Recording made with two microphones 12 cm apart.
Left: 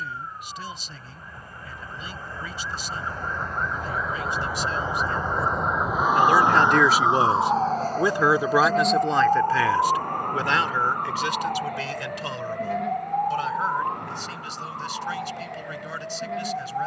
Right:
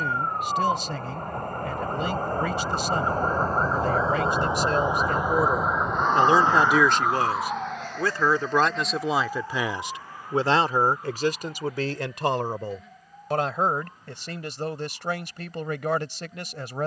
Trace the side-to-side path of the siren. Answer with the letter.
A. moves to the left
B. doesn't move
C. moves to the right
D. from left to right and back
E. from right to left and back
A.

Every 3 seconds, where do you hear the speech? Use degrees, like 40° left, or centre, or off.
70° right, 60° right, centre, 30° right, 60° right, 70° right.